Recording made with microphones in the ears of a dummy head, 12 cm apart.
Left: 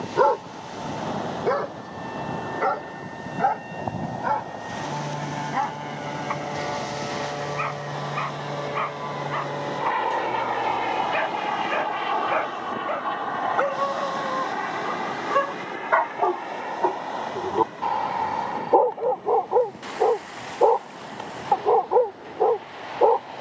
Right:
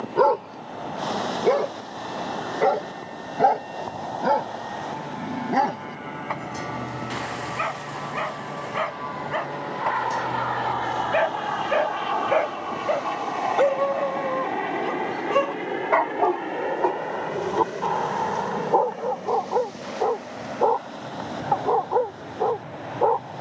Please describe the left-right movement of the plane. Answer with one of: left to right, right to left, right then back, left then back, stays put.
left to right.